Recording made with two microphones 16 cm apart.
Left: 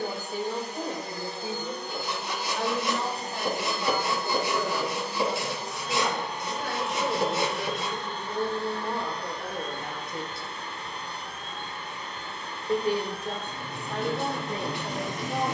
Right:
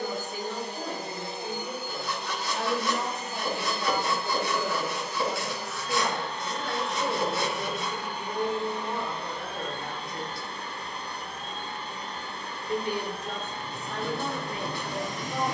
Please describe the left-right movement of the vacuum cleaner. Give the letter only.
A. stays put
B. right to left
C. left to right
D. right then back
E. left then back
E.